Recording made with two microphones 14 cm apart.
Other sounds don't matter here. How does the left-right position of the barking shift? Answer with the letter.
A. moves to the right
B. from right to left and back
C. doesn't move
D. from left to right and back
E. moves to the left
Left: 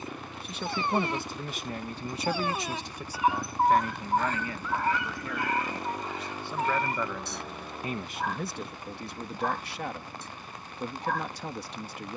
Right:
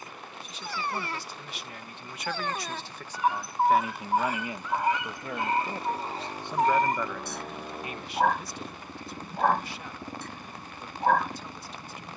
A.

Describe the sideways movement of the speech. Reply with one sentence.
You can hear the speech go right and come back.